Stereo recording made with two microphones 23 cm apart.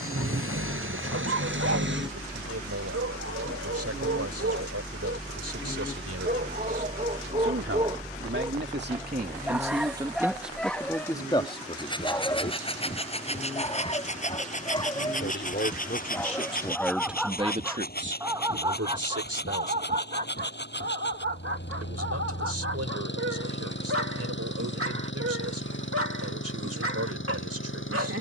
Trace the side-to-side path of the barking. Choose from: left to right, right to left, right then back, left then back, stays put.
left then back.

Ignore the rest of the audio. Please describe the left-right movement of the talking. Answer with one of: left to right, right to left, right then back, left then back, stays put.
left then back.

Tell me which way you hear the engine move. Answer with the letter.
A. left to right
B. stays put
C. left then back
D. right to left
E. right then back
D.